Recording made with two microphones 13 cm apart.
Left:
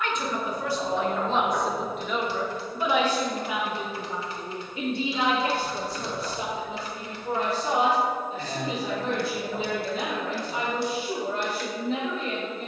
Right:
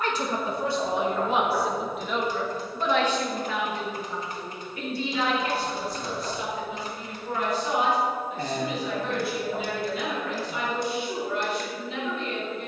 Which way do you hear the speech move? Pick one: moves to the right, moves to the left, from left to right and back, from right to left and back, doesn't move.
moves to the left.